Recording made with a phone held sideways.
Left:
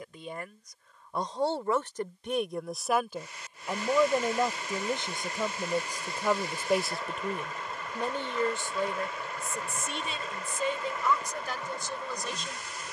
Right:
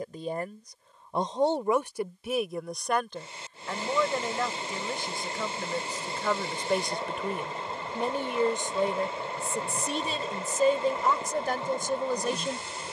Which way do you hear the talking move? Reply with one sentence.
You can hear the talking move from right to left and back again.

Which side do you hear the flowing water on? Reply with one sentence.
You can hear the flowing water on the right.